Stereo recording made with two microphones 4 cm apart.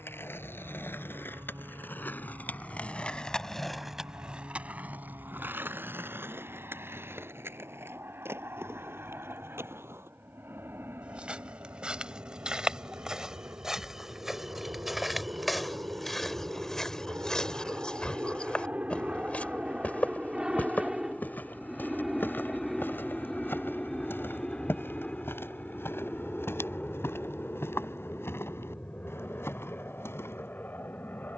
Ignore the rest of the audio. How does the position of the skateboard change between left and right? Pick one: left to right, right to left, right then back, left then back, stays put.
left to right.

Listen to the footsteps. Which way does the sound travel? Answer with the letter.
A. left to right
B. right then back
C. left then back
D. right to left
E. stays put
D.